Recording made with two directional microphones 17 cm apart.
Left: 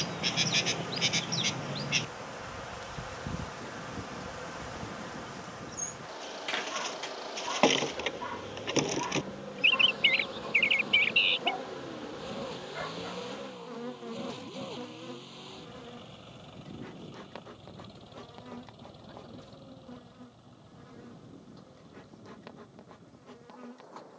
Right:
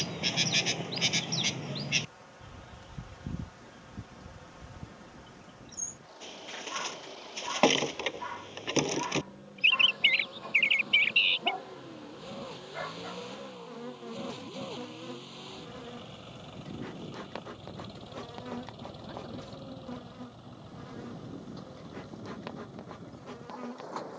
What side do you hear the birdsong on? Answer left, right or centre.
centre.